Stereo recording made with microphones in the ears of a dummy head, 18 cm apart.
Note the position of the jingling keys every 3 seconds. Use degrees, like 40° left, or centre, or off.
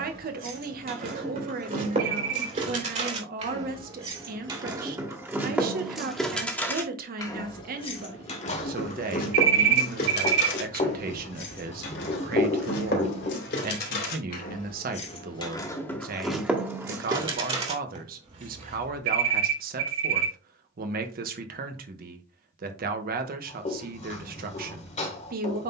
50° right, 20° right, 20° left, 60° left, 60° left, centre, 40° right, off, off.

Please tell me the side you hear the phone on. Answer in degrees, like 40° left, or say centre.
60° right.